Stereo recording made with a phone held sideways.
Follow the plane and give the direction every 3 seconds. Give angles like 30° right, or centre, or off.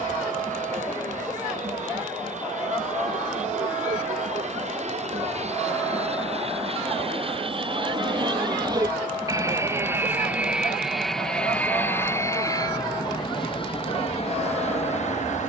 60° right, 60° right, 40° right, centre, 30° left.